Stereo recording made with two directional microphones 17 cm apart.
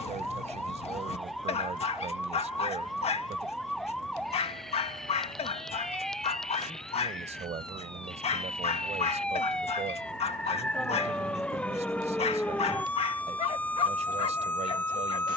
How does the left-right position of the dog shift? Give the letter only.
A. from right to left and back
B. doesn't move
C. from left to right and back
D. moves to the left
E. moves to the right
B.